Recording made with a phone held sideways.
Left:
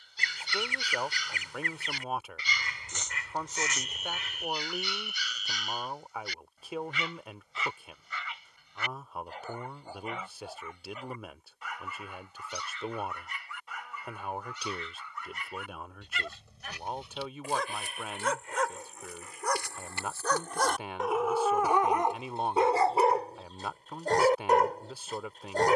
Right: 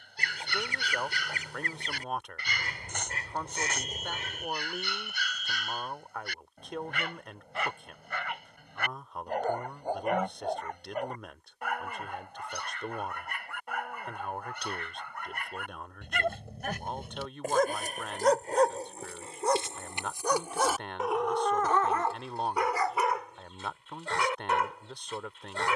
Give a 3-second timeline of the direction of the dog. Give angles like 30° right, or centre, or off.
60° right, 60° right, 60° right, 60° right, 60° right, 50° right, 30° right, 20° left, 40° left.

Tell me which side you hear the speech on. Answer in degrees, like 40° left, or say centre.
10° left.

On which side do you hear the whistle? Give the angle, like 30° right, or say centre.
70° left.